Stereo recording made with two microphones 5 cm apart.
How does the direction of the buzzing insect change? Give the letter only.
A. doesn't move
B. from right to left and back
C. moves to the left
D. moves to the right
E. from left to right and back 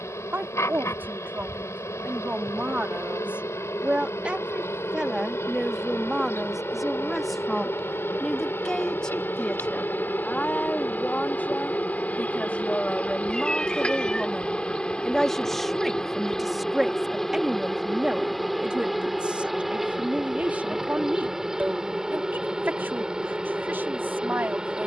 D.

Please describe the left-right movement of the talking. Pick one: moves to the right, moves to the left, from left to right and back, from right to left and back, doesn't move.
from right to left and back.